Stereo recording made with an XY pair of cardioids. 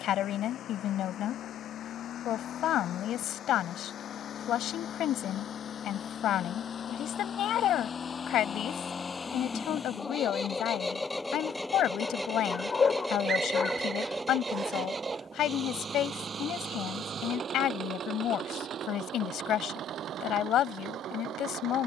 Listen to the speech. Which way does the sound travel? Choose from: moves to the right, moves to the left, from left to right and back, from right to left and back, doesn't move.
doesn't move.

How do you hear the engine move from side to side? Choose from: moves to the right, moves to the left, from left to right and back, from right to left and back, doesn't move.
moves to the right.